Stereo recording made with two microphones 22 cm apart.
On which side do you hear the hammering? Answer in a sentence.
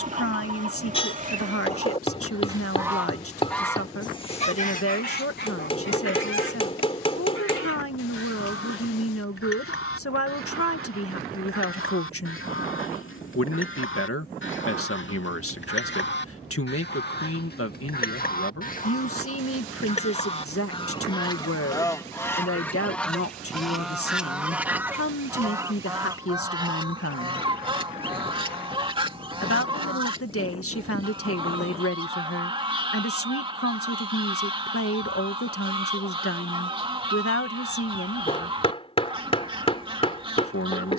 You can hear the hammering on the left.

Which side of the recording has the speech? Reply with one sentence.
In this clip you hear the speech on the left.